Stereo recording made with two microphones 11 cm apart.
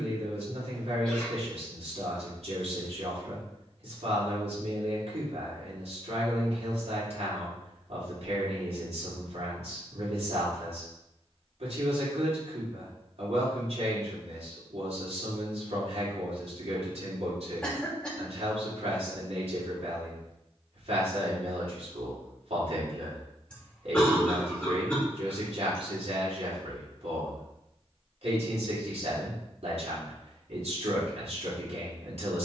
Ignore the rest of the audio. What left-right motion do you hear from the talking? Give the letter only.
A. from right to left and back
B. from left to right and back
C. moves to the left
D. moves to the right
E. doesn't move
E.